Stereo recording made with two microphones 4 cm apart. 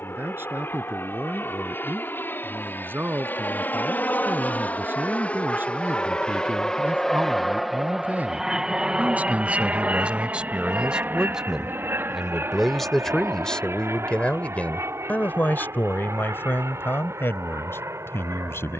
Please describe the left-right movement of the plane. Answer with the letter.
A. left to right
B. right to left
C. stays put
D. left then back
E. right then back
A.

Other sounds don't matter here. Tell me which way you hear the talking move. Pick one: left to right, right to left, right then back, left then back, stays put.
right to left.